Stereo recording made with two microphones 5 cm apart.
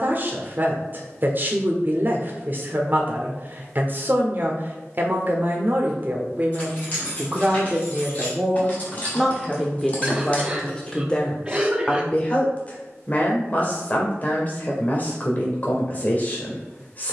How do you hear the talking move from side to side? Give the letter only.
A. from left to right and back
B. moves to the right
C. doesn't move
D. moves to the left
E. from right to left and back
D.